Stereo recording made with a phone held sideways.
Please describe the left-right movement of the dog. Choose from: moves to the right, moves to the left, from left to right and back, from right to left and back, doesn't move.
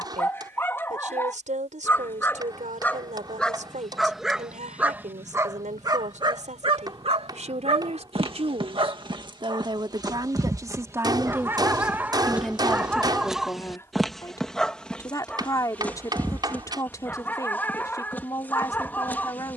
from left to right and back.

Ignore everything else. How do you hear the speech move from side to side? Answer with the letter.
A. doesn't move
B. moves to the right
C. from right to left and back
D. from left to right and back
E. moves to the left
E.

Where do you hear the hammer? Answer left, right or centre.
right.